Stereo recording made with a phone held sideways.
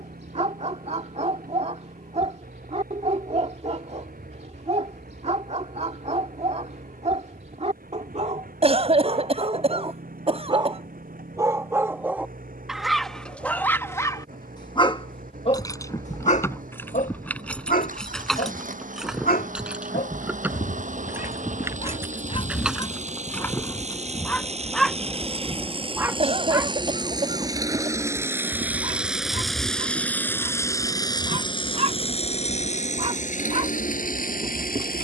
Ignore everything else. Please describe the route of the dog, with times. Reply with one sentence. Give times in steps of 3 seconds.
You can hear the dog on the right from 0 s, in the centre from 12 s, on the left from 15 s, in the centre from 24 s and on the right from 27 s.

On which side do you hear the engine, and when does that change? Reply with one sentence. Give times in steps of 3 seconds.
In this clip you hear the engine on the right from 0 s, in the centre from 27 s and on the left from 30 s.